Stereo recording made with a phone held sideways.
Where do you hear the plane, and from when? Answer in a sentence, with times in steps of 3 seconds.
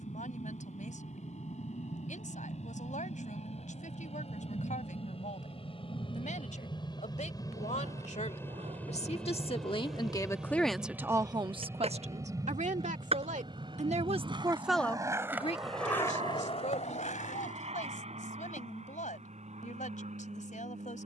In this clip you hear the plane on the left from 0 s, in the centre from 9 s and on the right from 12 s.